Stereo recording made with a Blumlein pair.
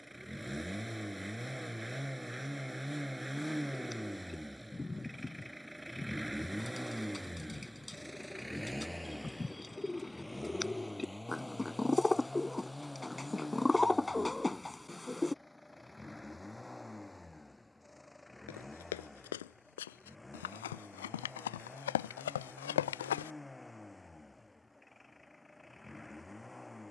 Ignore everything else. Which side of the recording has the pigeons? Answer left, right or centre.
centre.